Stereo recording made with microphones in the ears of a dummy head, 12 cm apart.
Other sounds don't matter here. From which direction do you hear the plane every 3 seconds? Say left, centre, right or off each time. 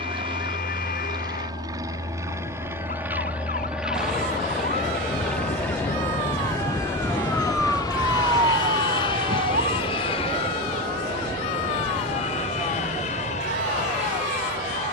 right, centre, left, left, left.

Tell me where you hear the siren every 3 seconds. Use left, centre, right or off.
left, left, centre, right, right.